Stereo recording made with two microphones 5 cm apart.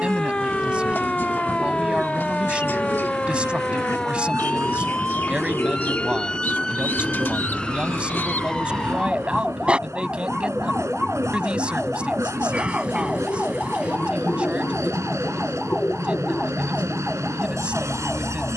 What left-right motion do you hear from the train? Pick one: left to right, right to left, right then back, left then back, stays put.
stays put.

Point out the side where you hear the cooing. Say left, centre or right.
left.